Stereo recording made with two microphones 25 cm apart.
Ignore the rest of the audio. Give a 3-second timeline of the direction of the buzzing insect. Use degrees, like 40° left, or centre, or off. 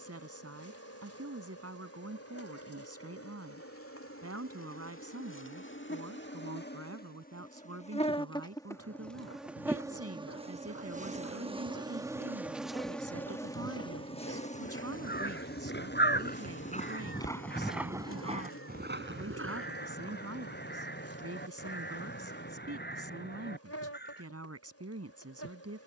70° left, 60° left, 30° left, 20° right, 10° left, 50° left, 60° left, 70° left, 70° left.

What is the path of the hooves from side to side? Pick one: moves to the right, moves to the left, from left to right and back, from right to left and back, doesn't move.
moves to the right.